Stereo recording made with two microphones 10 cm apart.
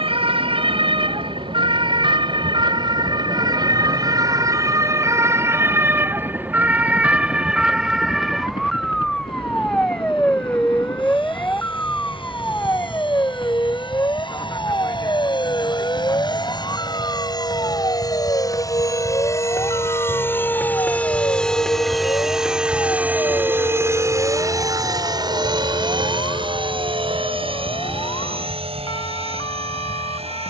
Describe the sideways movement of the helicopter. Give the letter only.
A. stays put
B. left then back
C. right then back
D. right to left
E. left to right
E.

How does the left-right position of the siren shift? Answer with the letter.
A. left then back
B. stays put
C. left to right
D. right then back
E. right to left
E.